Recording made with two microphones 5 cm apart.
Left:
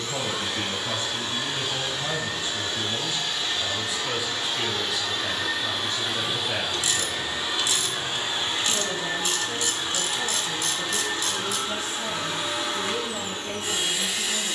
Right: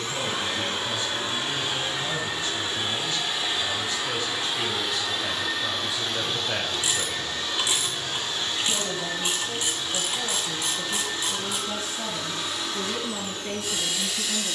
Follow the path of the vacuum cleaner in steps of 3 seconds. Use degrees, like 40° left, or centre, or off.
30° right, 10° right, 20° left, 40° left, 40° left.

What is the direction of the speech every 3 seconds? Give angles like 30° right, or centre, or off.
40° left, 10° left, 20° right, 40° right, 50° right.